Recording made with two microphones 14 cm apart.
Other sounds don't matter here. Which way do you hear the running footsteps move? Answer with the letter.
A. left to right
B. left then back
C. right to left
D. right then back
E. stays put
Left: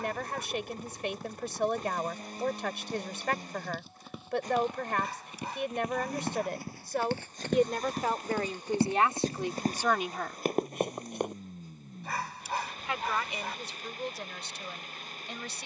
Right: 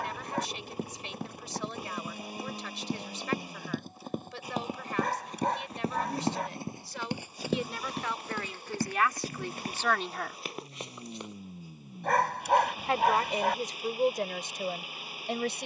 C.